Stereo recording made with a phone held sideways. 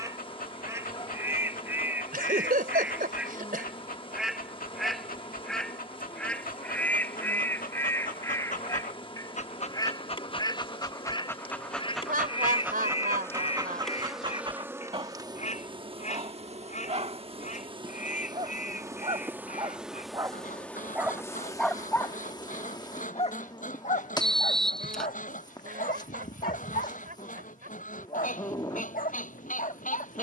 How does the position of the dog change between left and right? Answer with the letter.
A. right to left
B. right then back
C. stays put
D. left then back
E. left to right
B.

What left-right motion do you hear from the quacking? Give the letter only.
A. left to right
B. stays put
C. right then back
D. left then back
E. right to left
E.